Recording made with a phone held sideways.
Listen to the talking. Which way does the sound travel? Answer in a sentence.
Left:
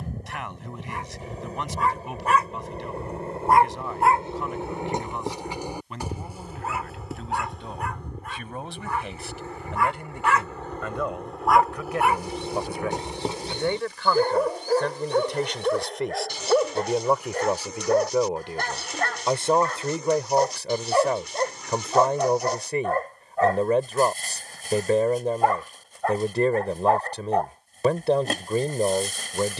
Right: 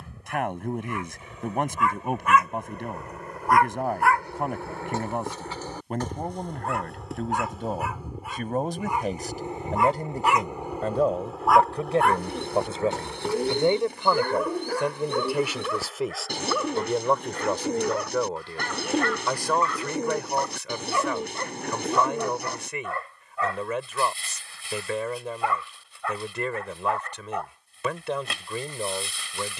In this clip you hear the talking move to the left.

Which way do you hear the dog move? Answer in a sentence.
You can hear the dog go right and come back.